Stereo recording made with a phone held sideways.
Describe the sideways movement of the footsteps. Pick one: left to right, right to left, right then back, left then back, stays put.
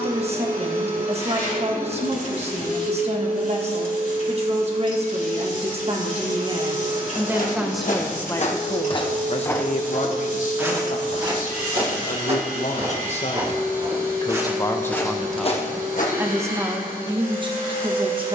right then back.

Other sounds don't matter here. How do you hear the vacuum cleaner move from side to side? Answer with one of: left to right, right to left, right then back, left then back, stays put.
stays put.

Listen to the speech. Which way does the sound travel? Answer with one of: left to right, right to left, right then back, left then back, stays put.
left then back.